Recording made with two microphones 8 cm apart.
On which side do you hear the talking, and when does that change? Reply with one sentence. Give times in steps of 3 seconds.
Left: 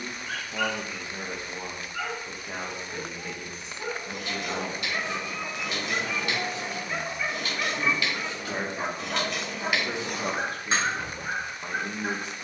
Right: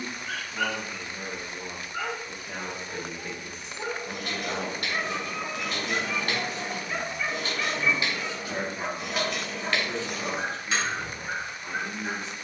In this clip you hear the talking on the left from 0 s, in the centre from 3 s and on the left from 9 s.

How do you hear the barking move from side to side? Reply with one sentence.
You can hear the barking move from right to left.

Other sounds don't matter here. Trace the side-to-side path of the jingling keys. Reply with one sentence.
You can hear the jingling keys go from the right side to the left.